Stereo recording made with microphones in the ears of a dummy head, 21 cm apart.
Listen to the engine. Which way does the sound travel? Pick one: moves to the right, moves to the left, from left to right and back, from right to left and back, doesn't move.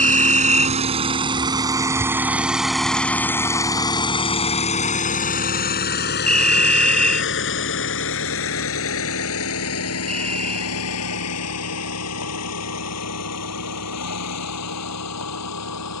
moves to the left.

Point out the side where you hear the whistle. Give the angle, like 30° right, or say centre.
centre.